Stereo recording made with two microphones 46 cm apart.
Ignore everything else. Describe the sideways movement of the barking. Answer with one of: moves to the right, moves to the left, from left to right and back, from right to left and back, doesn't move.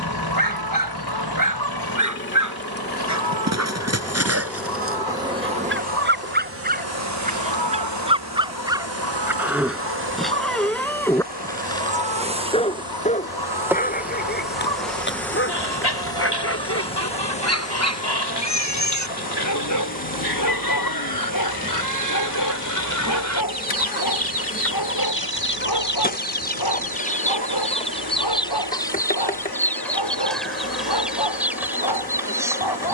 moves to the left.